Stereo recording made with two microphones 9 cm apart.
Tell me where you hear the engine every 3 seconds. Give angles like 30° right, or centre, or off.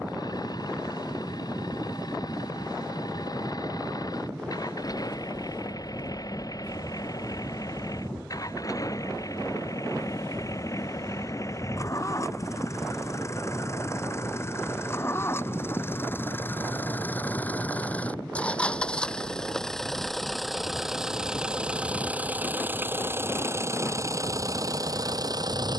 50° left, 50° left, 40° left, 40° left, 30° left, 20° left, 10° left, 20° right, 40° right.